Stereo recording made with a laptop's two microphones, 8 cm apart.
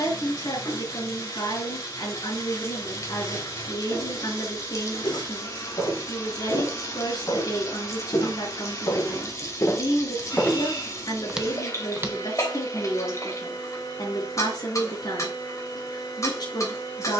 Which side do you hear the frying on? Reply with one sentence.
In this clip you hear the frying on the left.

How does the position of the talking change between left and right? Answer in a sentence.
In this clip you hear the talking stay put.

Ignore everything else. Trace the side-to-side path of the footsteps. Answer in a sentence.
You can hear the footsteps travel towards the right.